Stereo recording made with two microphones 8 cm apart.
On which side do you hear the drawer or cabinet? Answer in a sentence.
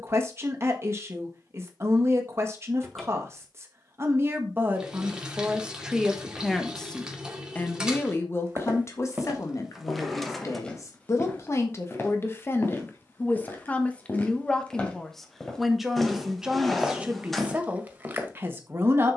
In this clip you hear the drawer or cabinet in the centre.